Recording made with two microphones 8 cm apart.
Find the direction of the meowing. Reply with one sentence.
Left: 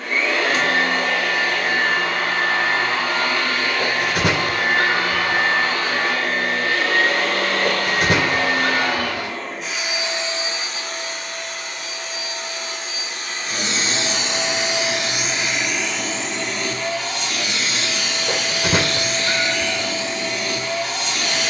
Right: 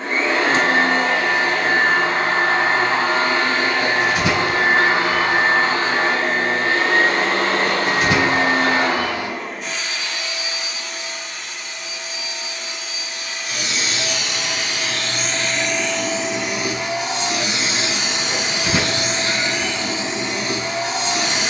You can hear the meowing on the left.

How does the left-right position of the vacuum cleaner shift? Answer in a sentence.
You can hear the vacuum cleaner go left and come back.